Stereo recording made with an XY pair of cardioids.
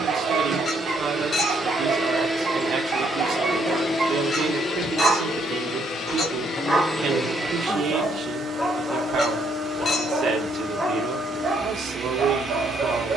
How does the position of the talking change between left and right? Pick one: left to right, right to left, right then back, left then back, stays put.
stays put.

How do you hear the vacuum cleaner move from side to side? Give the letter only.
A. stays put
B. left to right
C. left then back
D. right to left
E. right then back
C.